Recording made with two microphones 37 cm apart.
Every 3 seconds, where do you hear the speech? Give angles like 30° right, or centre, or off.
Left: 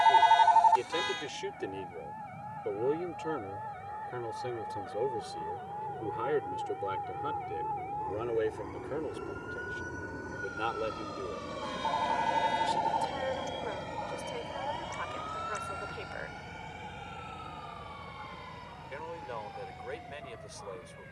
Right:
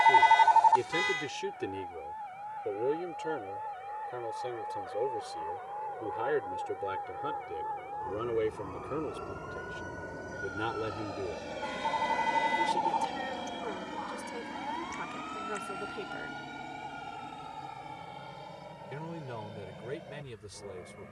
20° right, 20° left, centre, 20° right, 50° right, 50° right, 50° right.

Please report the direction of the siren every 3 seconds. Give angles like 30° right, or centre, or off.
50° right, 40° right, 30° right, centre, 40° left, 60° left, 70° left.